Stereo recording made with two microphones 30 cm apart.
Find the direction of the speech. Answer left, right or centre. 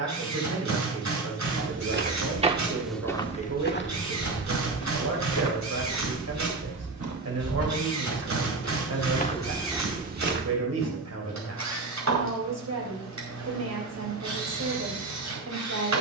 right.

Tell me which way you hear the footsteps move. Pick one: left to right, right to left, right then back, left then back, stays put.
left then back.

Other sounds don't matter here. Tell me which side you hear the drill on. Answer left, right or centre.
right.